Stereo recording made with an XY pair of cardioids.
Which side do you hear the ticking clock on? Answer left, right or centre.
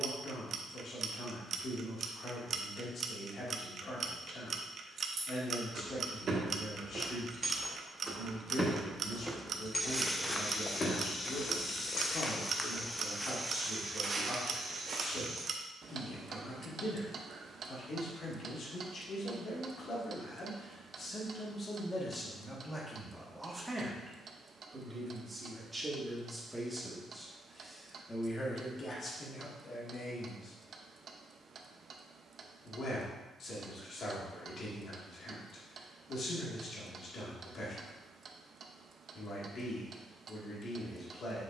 right.